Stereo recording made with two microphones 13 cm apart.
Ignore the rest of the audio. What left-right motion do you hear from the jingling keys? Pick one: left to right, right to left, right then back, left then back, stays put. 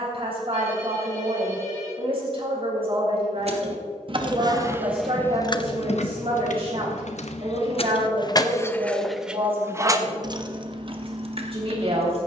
left then back.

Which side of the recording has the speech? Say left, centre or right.
right.